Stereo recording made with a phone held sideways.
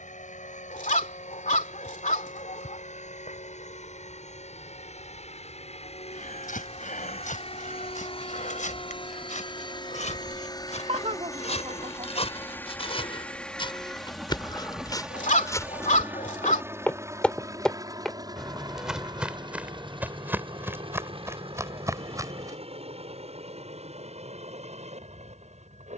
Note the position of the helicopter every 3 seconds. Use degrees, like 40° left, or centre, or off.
70° left, 60° left, 50° left, 30° left, 10° left, 20° right, 30° right, 50° right, 50° right.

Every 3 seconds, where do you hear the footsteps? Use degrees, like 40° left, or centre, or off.
off, off, 70° left, 60° left, 40° left, 20° left, 10° right, 20° right, off.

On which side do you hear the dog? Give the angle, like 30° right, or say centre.
70° left.